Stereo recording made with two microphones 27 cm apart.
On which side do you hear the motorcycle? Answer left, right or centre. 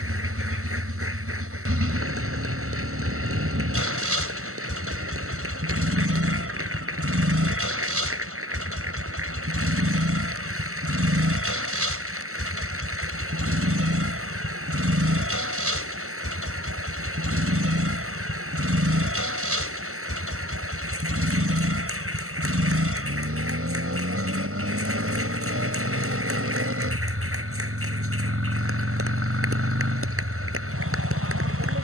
right.